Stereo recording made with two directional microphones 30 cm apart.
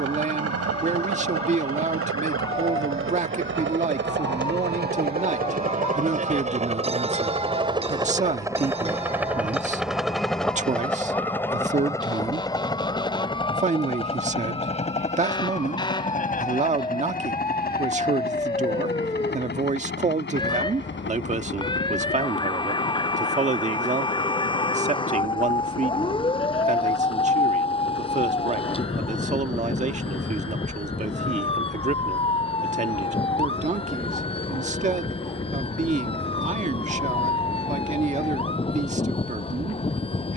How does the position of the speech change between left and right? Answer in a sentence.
You can hear the speech stay put.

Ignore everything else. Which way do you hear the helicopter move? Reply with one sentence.
In this clip you hear the helicopter go from the right side to the left.